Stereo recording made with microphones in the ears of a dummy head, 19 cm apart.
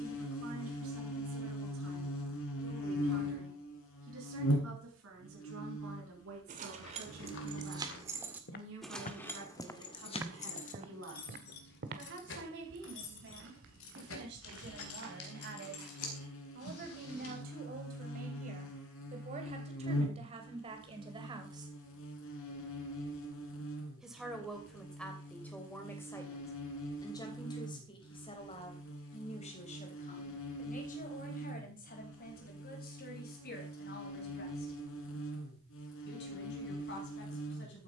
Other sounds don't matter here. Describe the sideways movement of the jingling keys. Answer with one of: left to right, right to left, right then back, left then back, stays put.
right to left.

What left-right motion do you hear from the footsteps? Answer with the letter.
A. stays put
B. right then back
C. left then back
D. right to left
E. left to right
E.